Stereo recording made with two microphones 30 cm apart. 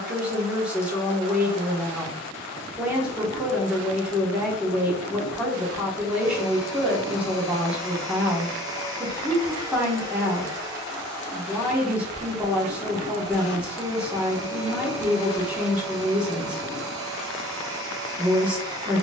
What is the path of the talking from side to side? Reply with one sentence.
You can hear the talking stay in one place.